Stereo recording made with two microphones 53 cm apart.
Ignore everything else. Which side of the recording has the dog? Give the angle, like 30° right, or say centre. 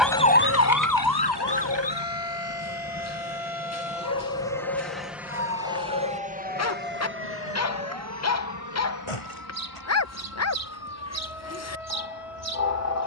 30° left.